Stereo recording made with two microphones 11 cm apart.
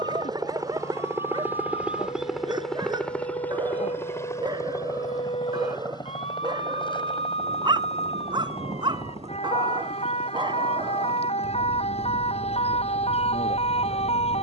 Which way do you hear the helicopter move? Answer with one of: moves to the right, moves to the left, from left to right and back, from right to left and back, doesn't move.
moves to the left.